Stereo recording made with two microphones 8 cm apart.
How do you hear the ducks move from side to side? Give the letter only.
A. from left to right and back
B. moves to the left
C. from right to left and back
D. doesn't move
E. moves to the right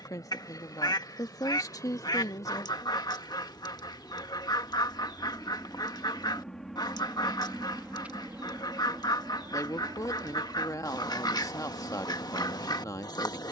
D.